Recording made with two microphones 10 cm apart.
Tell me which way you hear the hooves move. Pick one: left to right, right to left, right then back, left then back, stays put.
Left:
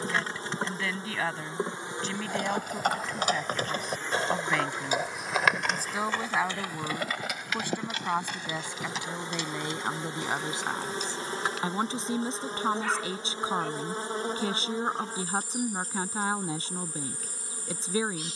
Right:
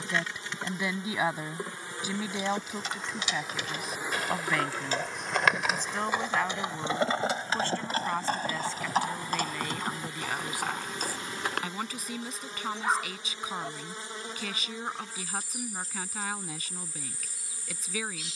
left to right.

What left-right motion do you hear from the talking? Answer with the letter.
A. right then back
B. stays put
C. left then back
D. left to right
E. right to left
E.